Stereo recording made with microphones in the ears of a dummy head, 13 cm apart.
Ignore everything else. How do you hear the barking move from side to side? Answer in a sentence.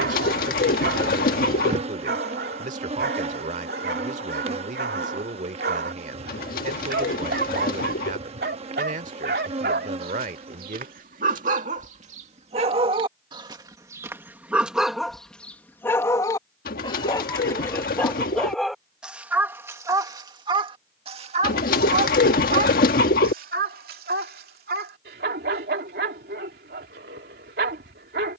In this clip you hear the barking move from right to left and back again.